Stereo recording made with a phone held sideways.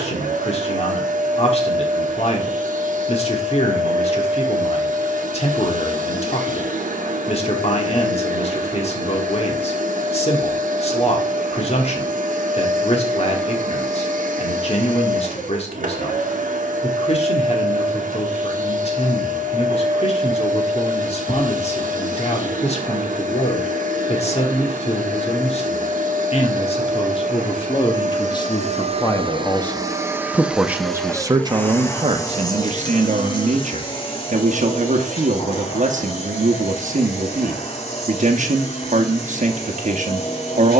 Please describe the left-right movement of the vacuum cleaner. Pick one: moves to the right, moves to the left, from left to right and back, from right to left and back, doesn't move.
moves to the left.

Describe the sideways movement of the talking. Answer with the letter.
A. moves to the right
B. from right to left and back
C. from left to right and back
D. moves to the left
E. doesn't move
A.